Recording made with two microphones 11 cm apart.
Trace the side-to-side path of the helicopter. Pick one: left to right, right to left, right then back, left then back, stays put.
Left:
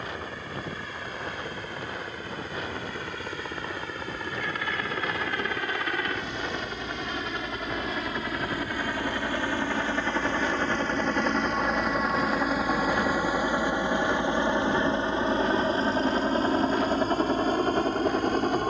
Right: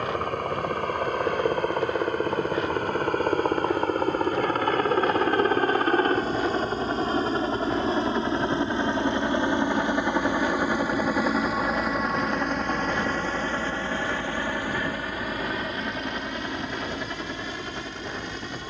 right to left.